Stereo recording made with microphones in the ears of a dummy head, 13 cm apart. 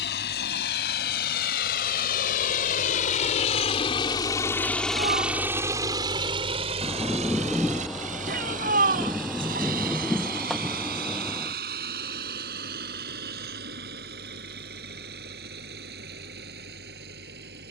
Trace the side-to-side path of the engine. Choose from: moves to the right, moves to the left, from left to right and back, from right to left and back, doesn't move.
moves to the right.